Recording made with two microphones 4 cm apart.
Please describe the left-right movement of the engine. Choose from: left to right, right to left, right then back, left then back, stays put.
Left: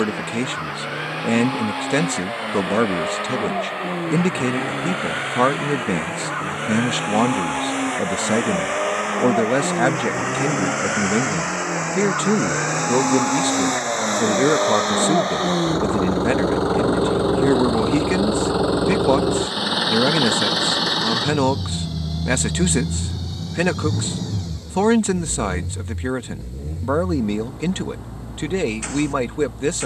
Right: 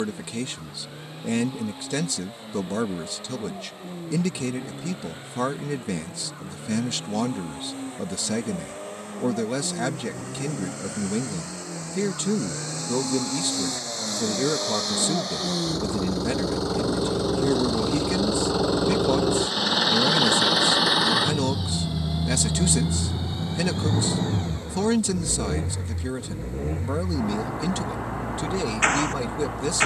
left to right.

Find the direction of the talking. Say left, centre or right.
left.